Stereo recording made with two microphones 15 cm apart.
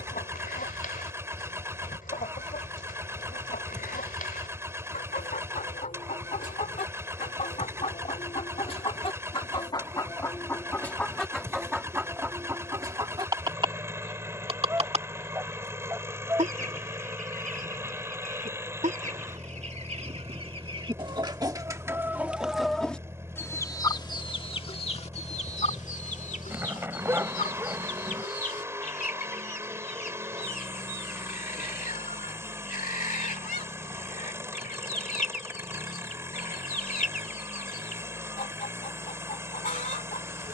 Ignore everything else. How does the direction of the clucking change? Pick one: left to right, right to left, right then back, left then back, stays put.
right then back.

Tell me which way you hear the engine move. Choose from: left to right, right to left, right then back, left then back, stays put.
stays put.